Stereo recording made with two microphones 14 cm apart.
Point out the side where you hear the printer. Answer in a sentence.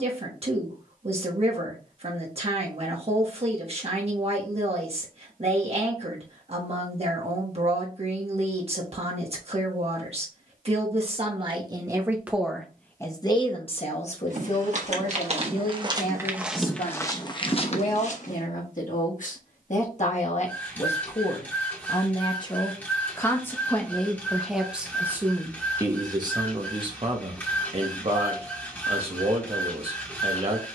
You can hear the printer in the centre.